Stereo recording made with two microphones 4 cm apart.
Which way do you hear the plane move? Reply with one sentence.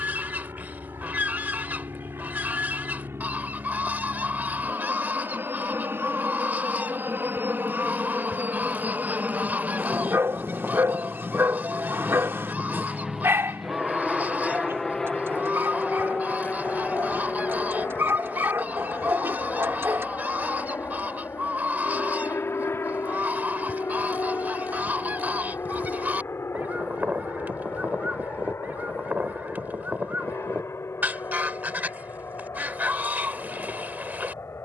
You can hear the plane go from the right side to the left.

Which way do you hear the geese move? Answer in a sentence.
You can hear the geese stay put.